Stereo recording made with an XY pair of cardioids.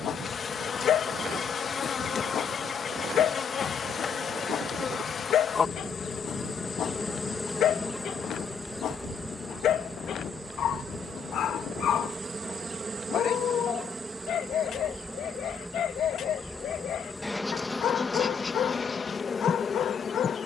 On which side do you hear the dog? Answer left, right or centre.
left.